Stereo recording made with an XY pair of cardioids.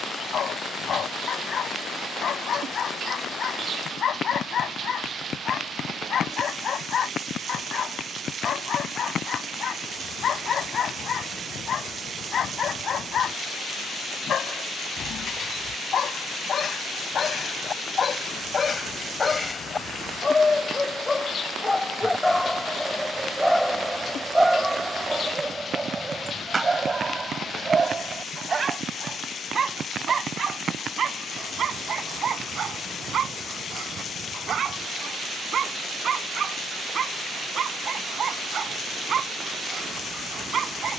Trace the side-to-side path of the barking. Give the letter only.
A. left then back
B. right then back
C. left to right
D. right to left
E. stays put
C.